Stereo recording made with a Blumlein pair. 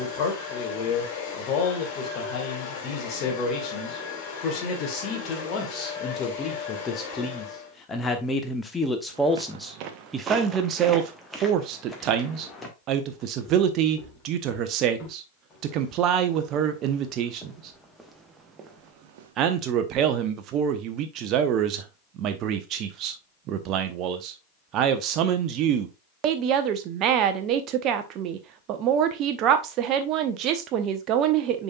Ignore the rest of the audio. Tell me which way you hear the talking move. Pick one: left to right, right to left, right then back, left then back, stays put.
left to right.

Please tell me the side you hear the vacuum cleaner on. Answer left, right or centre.
left.